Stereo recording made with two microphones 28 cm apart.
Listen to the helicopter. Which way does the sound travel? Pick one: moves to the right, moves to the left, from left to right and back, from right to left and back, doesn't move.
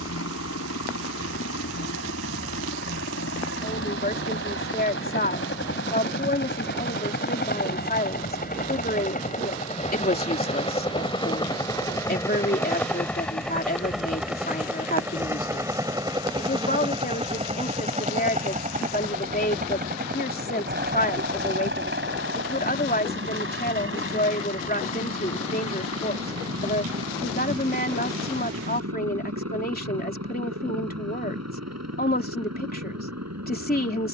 moves to the right.